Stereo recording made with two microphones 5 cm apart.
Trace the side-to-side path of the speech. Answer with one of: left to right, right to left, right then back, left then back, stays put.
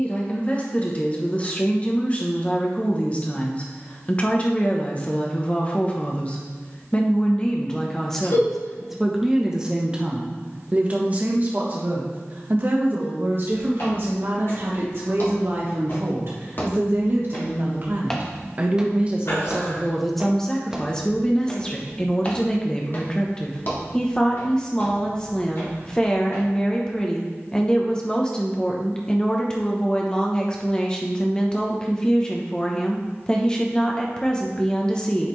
right then back.